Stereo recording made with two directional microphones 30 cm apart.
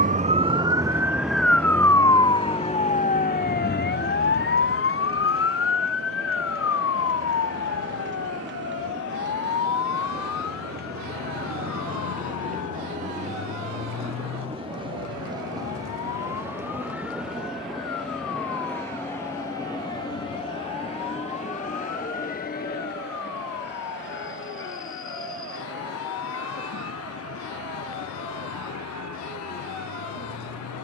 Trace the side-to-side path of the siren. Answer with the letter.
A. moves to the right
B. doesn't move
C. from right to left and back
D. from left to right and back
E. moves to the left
E.